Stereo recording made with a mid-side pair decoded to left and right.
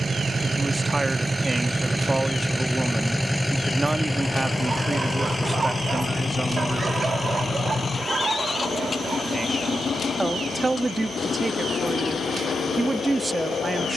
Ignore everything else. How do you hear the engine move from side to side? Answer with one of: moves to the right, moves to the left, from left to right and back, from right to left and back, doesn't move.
moves to the left.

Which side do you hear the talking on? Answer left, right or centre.
right.